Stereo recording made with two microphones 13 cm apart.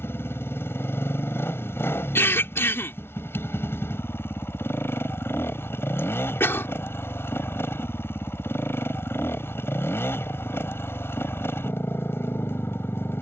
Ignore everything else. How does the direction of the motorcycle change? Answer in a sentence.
You can hear the motorcycle stay in one place.